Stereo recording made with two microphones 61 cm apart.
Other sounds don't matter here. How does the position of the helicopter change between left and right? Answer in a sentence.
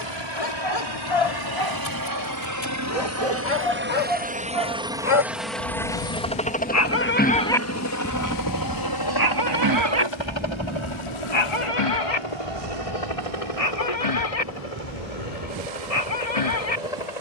In this clip you hear the helicopter go from the right side to the left.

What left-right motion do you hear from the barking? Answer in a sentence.
You can hear the barking move from left to right and back again.